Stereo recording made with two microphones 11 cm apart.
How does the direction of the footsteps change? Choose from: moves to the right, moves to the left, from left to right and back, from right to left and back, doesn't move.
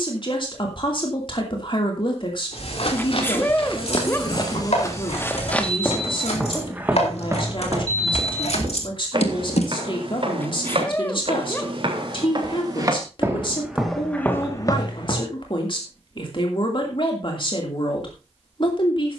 from left to right and back.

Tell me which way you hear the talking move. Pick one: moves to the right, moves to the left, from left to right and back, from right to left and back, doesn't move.
doesn't move.